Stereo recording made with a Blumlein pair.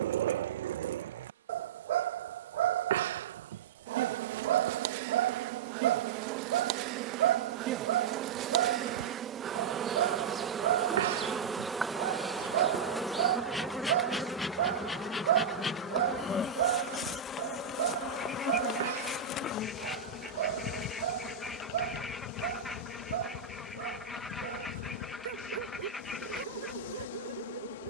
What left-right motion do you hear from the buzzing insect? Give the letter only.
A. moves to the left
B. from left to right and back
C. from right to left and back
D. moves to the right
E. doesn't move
A.